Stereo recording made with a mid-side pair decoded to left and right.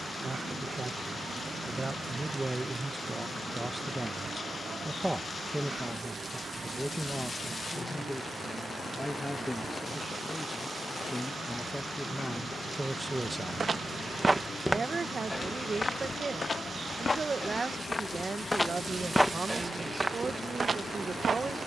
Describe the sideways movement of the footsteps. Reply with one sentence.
You can hear the footsteps move from right to left and back again.